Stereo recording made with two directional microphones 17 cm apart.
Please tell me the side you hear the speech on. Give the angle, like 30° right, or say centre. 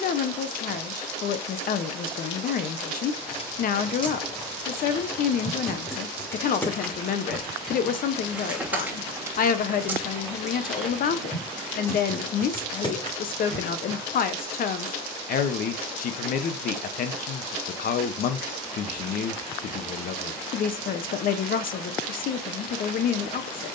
60° left.